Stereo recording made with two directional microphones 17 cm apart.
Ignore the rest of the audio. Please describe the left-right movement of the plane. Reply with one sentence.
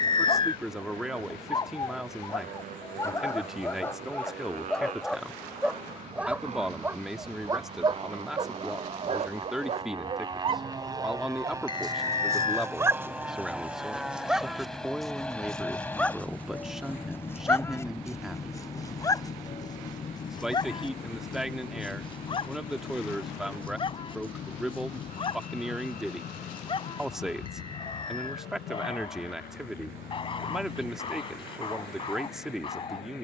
You can hear the plane move to the left.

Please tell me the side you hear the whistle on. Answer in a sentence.
You can hear the whistle on the left.